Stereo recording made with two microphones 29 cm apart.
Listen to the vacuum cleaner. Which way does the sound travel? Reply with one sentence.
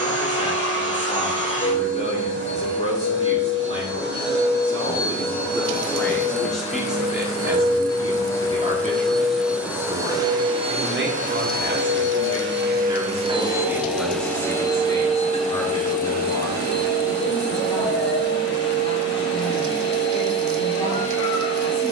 You can hear the vacuum cleaner go right and come back.